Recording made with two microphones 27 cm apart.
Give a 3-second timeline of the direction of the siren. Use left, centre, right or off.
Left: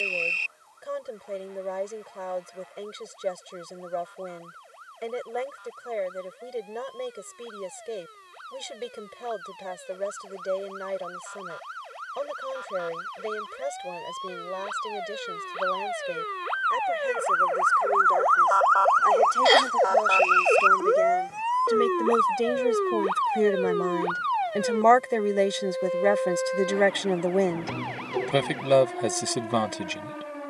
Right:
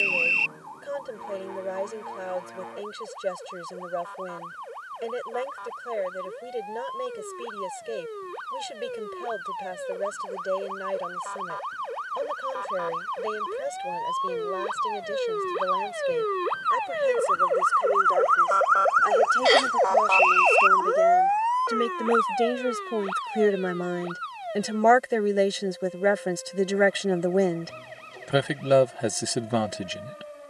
right, right, right, right, right, right, centre, left, left, left.